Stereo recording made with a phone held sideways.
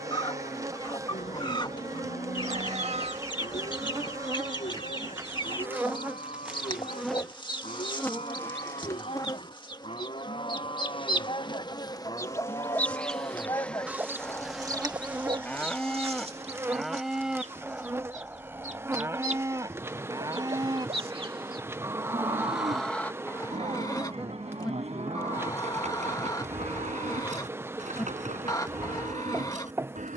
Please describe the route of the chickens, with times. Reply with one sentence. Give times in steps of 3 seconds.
You can hear the chickens on the left from 0 s, in the centre from 12 s, on the right from 15 s, in the centre from 21 s and on the left from 24 s.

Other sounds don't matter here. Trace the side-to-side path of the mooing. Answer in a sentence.
In this clip you hear the mooing travel towards the right.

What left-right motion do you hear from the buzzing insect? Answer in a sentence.
You can hear the buzzing insect go left and come back.